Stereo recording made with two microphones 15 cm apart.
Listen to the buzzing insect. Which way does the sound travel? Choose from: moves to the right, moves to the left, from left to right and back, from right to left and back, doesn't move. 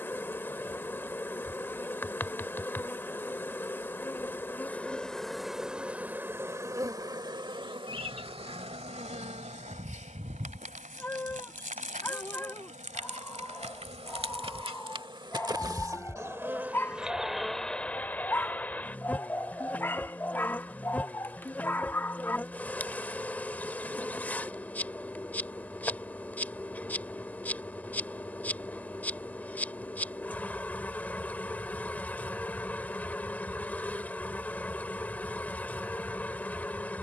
from left to right and back.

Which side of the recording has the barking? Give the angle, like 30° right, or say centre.
10° left.